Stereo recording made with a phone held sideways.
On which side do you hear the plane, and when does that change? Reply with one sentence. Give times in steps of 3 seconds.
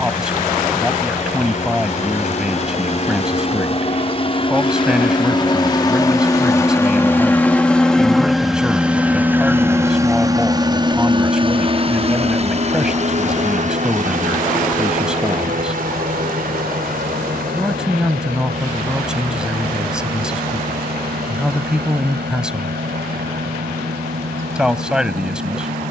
In this clip you hear the plane on the left from 0 s, in the centre from 6 s and on the right from 9 s.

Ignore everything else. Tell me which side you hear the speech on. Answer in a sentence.
In this clip you hear the speech in the centre.